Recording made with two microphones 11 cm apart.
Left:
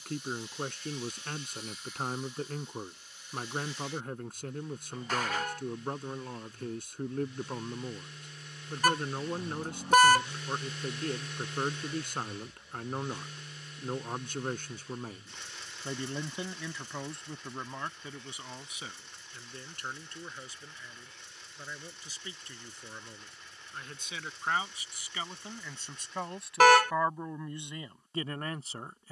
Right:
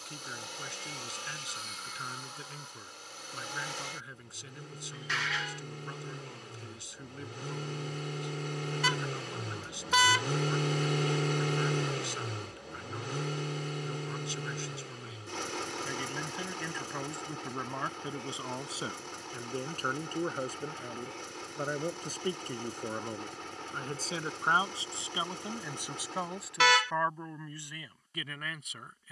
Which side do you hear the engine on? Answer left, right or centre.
right.